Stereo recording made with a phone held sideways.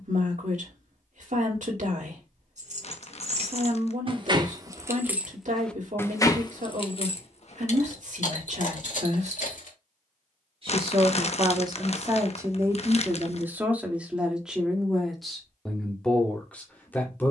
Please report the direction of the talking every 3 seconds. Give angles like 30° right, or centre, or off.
60° right, 60° right, 60° right, 40° right, 10° right, 10° left.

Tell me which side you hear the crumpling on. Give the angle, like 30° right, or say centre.
50° left.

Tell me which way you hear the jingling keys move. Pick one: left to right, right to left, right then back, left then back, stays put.
right to left.